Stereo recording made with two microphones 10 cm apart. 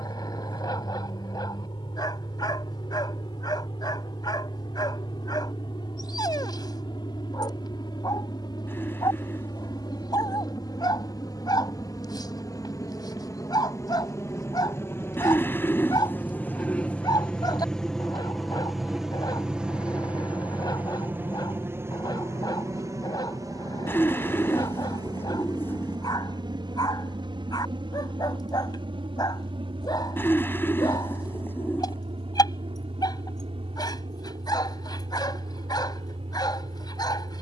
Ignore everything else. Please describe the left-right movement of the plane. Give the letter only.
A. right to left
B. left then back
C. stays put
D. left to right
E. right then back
D.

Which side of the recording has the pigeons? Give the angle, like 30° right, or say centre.
20° left.